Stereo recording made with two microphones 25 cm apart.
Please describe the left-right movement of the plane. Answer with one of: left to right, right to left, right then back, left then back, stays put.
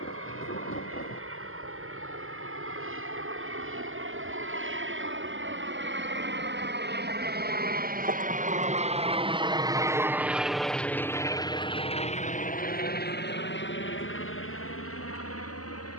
right to left.